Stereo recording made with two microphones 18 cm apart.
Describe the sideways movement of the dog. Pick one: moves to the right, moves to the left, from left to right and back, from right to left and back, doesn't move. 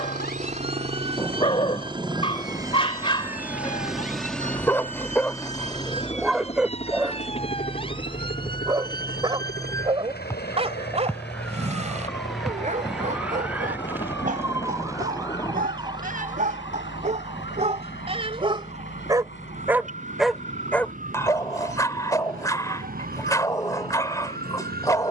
from left to right and back.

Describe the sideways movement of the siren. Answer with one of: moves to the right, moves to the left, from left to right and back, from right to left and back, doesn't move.
moves to the right.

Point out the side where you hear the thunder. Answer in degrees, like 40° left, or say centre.
20° left.